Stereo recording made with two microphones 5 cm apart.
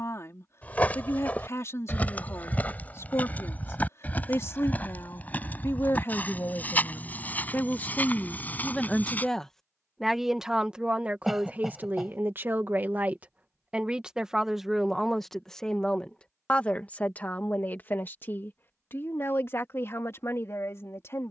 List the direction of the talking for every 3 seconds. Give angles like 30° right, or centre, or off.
50° left, 50° left, 30° left, 10° right, 20° right, 20° left, 50° left.